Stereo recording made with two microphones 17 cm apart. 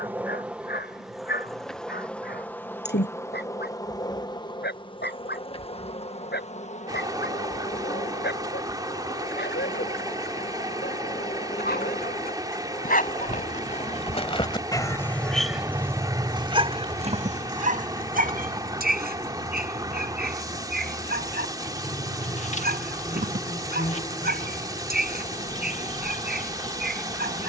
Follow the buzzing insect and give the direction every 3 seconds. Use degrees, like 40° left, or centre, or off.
centre, 30° left, 40° left, 40° left, 40° left, 40° left, 40° left, 40° left, 40° left.